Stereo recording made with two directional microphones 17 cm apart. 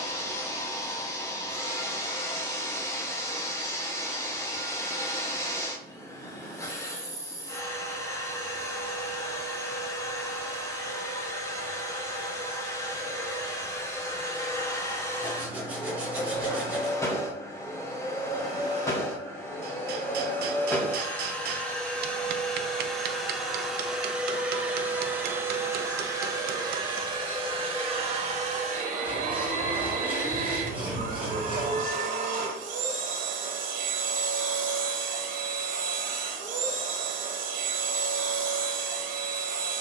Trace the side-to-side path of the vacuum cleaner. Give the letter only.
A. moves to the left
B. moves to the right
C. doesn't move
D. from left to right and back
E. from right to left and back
B.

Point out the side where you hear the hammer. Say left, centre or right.
right.